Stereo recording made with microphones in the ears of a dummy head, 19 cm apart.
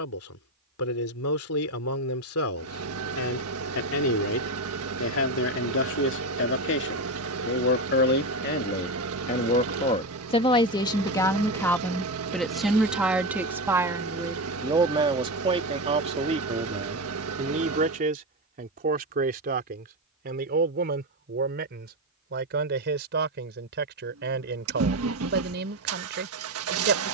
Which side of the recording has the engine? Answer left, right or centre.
right.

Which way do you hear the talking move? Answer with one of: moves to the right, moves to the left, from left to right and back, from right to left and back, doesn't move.
moves to the right.